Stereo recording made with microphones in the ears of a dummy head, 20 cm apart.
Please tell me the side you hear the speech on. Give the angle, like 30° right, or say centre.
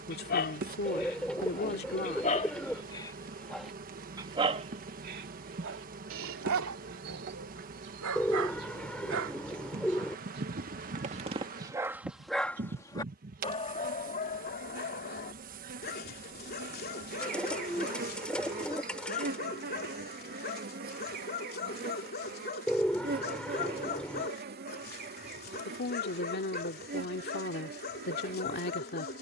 40° left.